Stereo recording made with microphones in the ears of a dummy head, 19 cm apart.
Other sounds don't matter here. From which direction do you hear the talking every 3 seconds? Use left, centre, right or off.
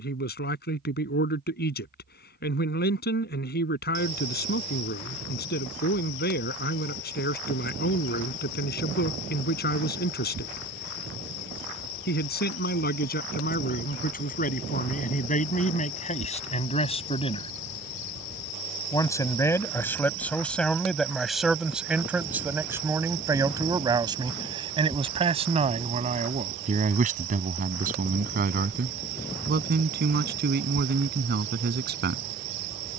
left, left, left, left, left, left, centre, centre, right, right, right.